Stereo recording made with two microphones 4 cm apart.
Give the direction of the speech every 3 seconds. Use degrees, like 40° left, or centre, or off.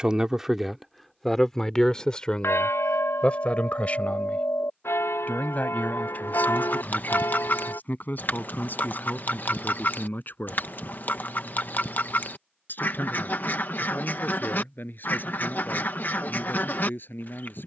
10° left, 40° left, 50° left, 50° left, 50° left, 50° left.